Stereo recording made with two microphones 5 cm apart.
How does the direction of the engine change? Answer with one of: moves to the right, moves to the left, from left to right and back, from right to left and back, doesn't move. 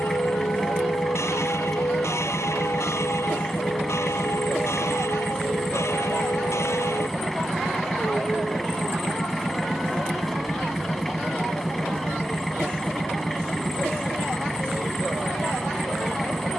doesn't move.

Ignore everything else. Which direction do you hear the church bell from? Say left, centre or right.
left.